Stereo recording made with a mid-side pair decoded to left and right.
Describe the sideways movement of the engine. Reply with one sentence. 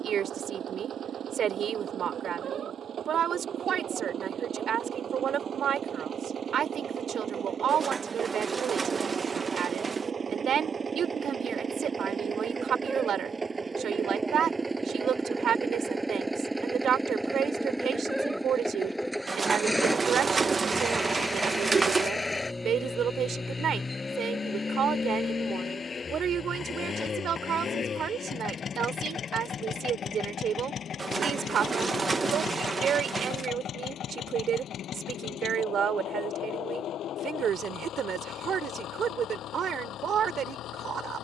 In this clip you hear the engine travel towards the left.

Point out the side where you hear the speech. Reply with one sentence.
In this clip you hear the speech on the right.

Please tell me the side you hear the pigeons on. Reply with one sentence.
You can hear the pigeons on the right.